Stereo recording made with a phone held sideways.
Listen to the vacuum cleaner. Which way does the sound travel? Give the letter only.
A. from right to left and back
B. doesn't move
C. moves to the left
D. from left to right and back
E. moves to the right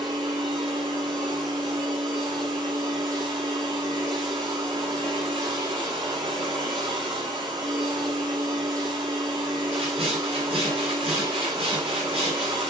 B.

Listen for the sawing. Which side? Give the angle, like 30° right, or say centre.
40° right.